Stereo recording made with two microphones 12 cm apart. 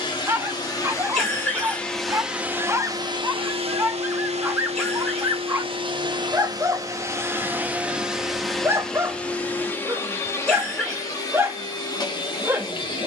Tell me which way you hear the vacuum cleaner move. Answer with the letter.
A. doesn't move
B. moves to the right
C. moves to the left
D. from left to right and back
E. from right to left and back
D.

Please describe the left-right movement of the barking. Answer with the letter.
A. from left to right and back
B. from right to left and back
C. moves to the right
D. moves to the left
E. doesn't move
E.